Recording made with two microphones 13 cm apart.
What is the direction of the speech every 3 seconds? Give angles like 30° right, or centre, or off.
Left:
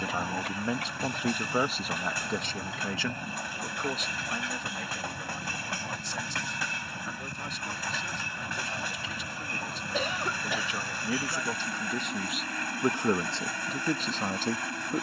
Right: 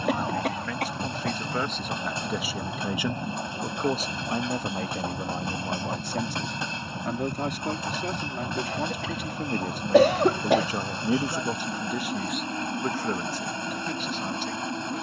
10° left, 40° right, 60° right, 40° right, 30° left.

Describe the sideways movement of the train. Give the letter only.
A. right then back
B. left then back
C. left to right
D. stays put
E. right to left
D.